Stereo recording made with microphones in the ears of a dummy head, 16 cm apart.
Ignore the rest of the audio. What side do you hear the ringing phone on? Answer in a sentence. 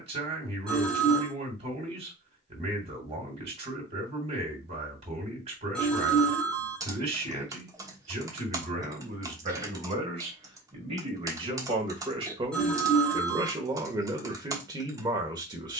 In this clip you hear the ringing phone in the centre.